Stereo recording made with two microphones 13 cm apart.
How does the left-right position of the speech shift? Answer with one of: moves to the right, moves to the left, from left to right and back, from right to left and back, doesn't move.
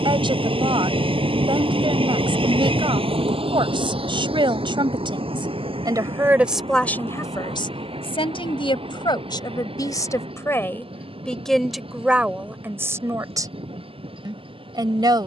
from right to left and back.